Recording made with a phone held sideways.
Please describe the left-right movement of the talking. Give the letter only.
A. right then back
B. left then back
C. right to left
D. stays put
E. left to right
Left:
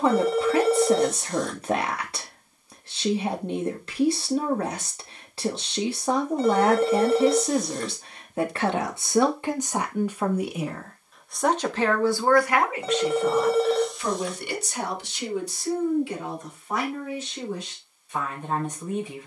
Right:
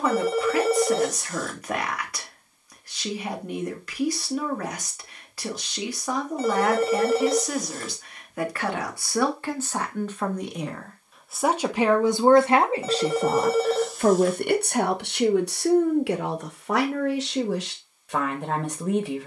E.